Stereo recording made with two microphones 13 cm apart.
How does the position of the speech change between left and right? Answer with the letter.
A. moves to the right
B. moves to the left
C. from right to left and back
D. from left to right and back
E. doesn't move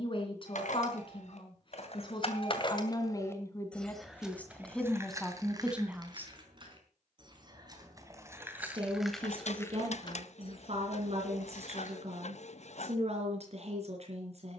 A.